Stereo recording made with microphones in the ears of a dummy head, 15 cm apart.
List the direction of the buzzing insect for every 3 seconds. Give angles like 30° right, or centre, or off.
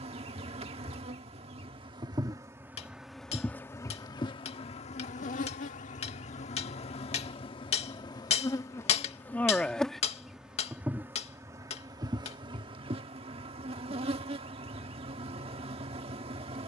30° right, 30° left, 30° left, 10° right, 30° right, 40° right.